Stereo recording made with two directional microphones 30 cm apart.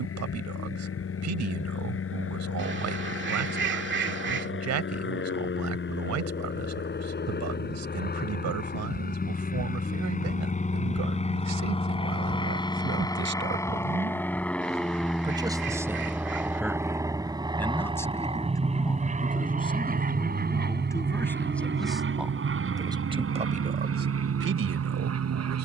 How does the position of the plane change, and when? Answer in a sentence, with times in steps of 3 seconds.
You can hear the plane on the left from 0 s, in the centre from 12 s and on the right from 18 s.